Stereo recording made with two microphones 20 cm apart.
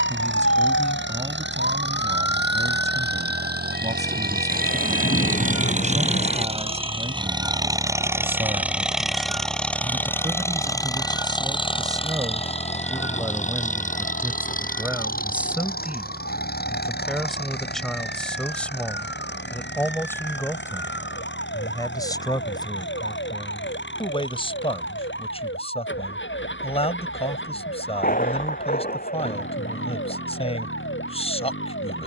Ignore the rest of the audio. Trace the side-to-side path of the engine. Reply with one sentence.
You can hear the engine go from the right side to the left.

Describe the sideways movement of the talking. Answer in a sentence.
You can hear the talking move from right to left.